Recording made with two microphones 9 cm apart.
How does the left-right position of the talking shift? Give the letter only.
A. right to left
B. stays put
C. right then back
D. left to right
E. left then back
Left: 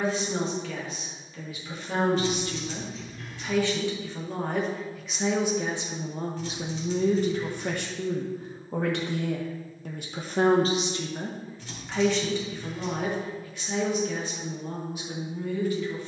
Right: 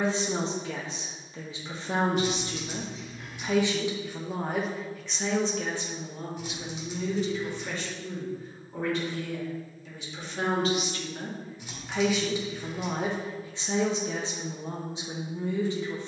E.